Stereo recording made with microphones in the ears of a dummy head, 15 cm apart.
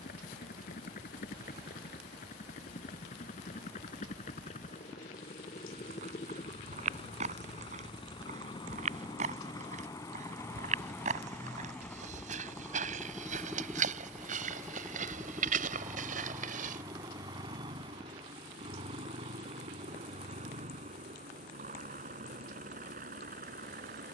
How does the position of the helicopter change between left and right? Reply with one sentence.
In this clip you hear the helicopter move from left to right.